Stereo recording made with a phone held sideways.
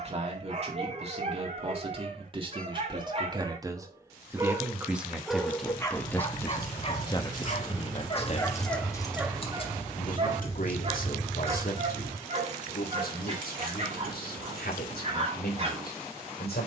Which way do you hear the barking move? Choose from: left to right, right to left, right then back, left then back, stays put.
left then back.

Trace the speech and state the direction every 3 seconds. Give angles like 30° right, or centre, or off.
40° right, 10° right, 30° left, 60° left, 80° left, 80° left.